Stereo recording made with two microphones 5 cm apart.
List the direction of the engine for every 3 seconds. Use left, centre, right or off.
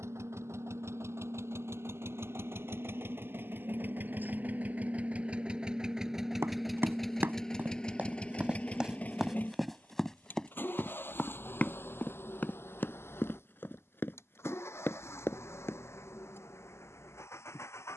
right, right, centre, left, left, left.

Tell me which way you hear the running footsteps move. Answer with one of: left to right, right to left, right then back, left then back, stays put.
right to left.